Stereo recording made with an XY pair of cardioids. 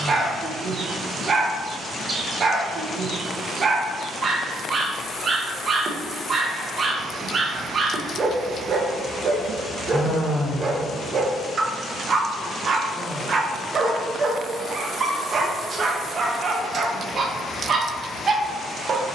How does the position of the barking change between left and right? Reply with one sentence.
You can hear the barking stay put.